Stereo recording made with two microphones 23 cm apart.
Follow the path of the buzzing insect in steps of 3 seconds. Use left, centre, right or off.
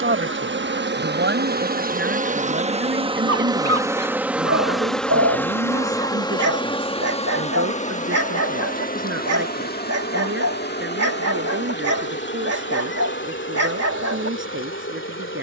right, centre, left, left, left.